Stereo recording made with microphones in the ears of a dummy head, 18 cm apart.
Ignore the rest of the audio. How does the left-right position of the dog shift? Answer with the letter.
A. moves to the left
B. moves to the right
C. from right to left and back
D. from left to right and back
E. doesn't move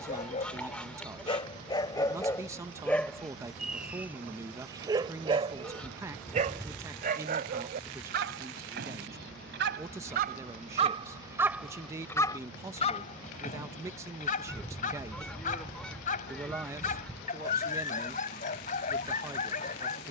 D.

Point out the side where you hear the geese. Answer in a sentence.
In this clip you hear the geese in the centre.